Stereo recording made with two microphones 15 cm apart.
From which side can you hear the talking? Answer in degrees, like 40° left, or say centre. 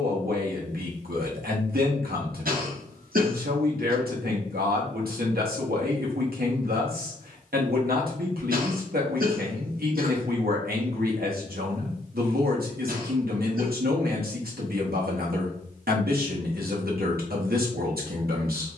80° right.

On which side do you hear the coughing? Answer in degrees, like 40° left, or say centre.
70° right.